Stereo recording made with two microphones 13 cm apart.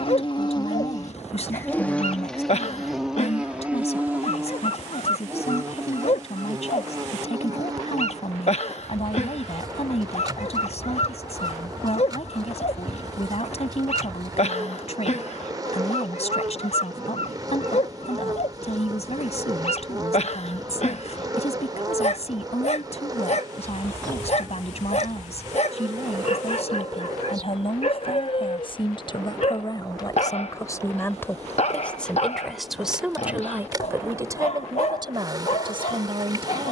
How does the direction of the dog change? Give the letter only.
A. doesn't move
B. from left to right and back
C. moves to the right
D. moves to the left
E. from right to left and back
A.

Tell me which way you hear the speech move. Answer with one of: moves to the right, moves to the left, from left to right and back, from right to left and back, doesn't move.
moves to the right.